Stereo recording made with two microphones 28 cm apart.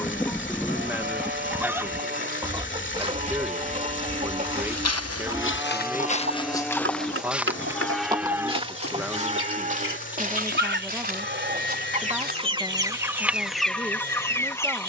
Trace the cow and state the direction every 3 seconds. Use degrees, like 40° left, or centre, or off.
40° right, 20° right, centre, 30° right, 40° right.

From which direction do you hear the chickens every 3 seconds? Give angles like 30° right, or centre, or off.
centre, 30° right, 50° right, 40° right, centre.